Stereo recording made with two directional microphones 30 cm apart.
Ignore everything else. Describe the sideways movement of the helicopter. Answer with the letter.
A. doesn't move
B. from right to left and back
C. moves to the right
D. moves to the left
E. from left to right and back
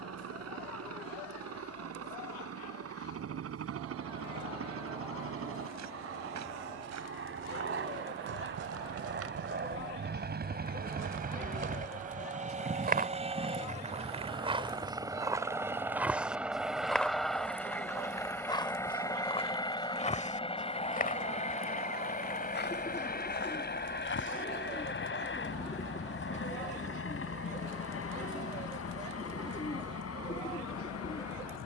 D.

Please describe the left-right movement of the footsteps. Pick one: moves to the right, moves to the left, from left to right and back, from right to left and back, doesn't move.
moves to the left.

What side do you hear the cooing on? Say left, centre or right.
left.